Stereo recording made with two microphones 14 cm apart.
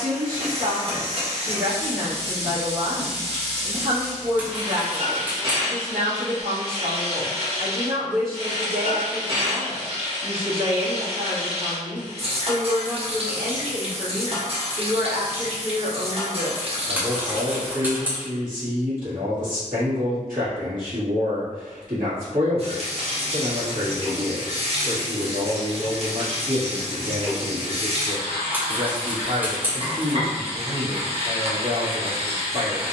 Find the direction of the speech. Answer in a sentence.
You can hear the speech on the right.